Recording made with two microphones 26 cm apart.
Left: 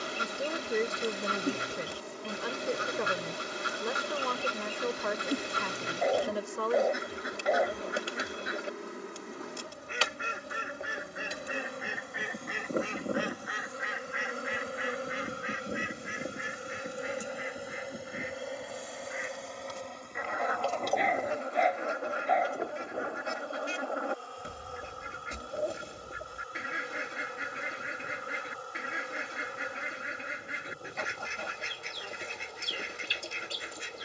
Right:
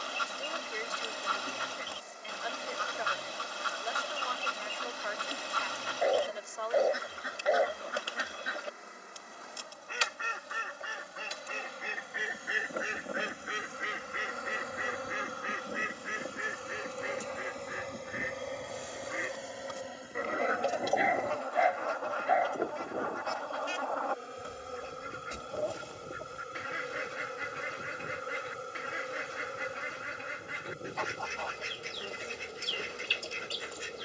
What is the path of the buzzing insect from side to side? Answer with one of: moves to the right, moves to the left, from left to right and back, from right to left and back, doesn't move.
moves to the right.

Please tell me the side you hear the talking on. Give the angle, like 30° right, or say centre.
60° left.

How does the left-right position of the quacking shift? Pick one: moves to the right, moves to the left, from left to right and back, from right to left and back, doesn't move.
from left to right and back.